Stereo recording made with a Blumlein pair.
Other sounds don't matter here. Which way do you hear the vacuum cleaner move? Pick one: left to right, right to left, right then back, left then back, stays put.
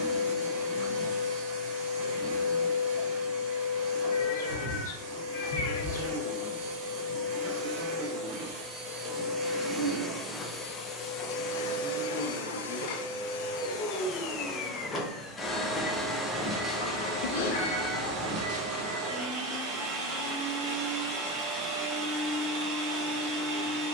left then back.